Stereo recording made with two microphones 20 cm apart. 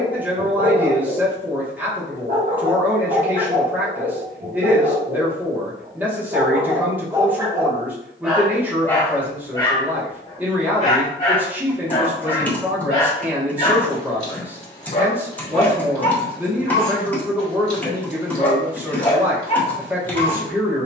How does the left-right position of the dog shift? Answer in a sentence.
You can hear the dog travel towards the left.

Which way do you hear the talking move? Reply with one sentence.
In this clip you hear the talking stay put.